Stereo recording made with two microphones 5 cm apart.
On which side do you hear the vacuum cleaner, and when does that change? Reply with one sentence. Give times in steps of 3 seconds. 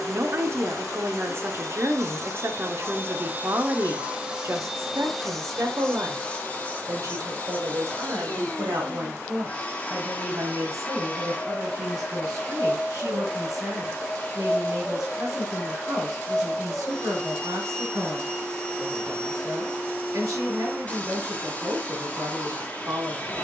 You can hear the vacuum cleaner on the right from 0 s, in the centre from 3 s and on the left from 6 s.